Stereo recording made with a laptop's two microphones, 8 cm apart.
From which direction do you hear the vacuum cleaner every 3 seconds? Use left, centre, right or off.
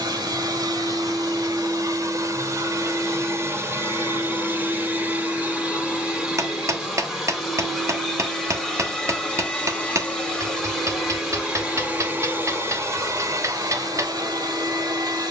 right, right, centre, centre, right.